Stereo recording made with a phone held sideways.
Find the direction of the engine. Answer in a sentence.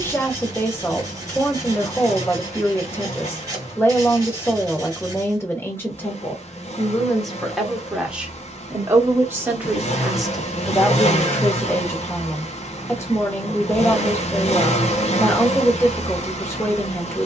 You can hear the engine on the left.